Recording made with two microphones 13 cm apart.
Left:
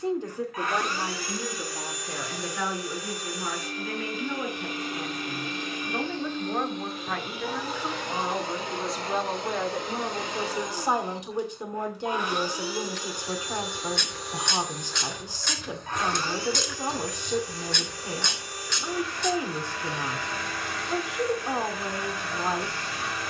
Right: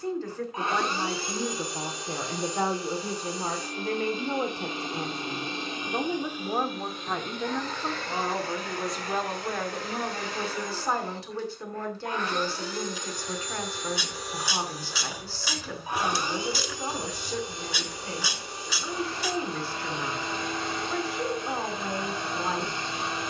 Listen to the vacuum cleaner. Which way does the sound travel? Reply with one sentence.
In this clip you hear the vacuum cleaner go left and come back.